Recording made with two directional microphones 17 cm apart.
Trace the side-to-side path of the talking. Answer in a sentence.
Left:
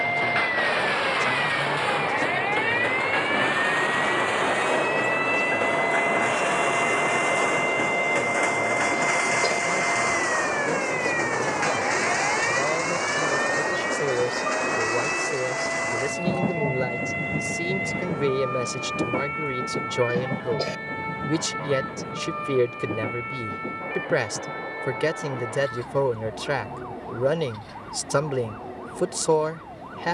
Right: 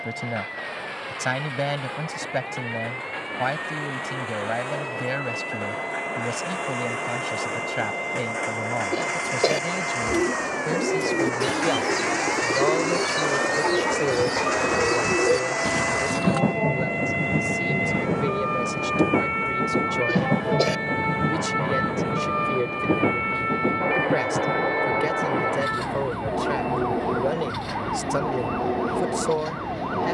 In this clip you hear the talking move from right to left.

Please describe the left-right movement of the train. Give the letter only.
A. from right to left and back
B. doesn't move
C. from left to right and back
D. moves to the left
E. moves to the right
E.